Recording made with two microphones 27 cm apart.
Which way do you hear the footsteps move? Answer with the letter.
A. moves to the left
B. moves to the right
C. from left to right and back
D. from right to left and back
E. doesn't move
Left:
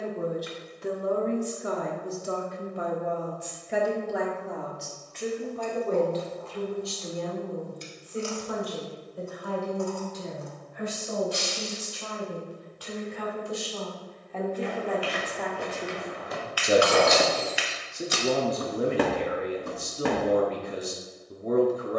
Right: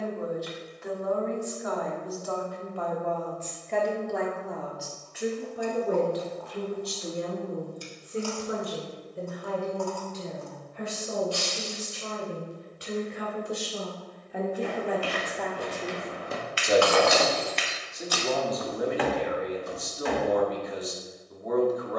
A.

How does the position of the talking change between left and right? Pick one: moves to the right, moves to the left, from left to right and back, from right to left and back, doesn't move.
from left to right and back.